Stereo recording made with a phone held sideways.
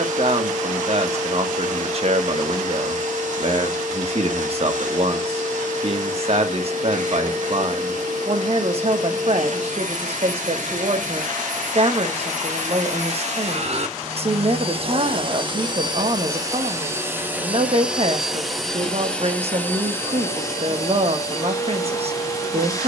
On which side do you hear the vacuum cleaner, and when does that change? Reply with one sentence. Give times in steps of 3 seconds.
In this clip you hear the vacuum cleaner on the right from 0 s, in the centre from 18 s and on the left from 21 s.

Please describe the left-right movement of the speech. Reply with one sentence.
In this clip you hear the speech stay in one place.